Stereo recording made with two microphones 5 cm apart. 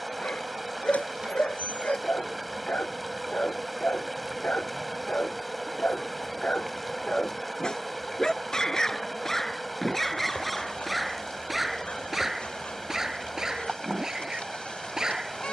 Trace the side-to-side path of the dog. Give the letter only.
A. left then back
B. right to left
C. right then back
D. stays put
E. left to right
E.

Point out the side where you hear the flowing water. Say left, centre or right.
centre.